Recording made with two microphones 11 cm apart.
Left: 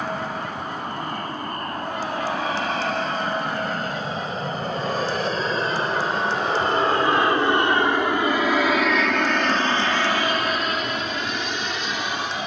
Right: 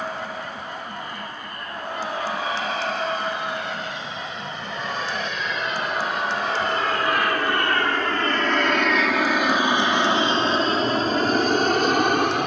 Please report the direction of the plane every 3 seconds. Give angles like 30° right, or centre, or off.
60° left, 50° left, 20° left, 30° right.